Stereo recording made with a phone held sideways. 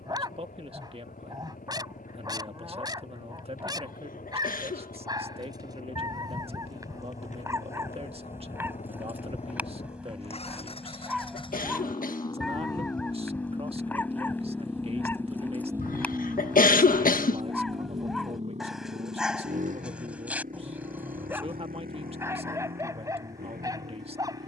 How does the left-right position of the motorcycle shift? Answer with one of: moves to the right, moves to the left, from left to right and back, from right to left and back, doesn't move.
moves to the right.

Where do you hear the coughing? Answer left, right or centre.
left.